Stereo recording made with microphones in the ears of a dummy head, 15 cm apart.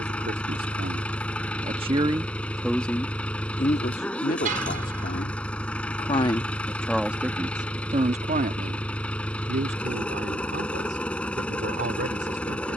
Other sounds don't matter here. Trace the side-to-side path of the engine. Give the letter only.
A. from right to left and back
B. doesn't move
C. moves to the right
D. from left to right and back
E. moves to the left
B.